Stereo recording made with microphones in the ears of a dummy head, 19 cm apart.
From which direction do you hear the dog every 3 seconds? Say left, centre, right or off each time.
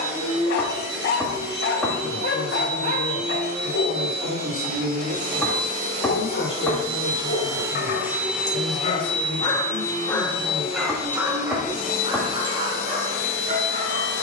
left, left, left, centre, right.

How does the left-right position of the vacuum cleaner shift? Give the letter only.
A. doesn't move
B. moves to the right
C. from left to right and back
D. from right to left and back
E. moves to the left
E.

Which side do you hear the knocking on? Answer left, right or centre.
centre.